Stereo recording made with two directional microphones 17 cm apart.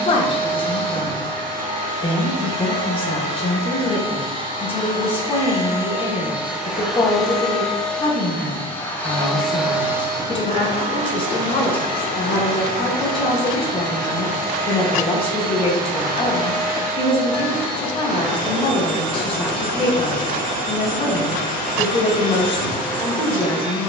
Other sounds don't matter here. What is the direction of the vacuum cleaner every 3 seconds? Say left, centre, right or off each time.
right, right, centre, right, right, right, right, right.